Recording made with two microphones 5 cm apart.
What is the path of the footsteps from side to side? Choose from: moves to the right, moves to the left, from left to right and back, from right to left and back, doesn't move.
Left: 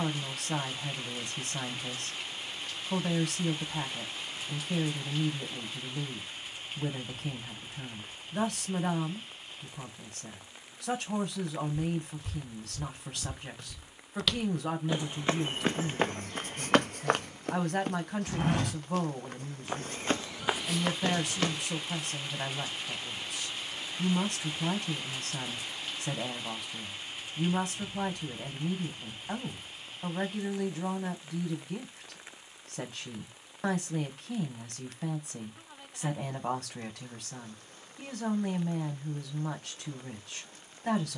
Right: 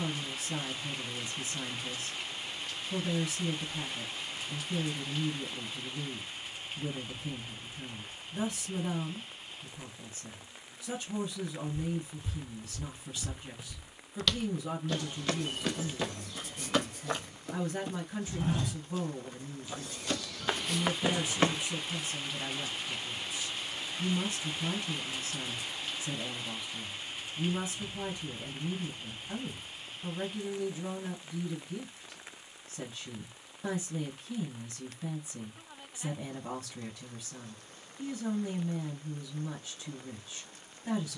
from right to left and back.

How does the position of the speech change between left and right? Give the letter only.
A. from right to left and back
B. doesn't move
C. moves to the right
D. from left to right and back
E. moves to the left
B.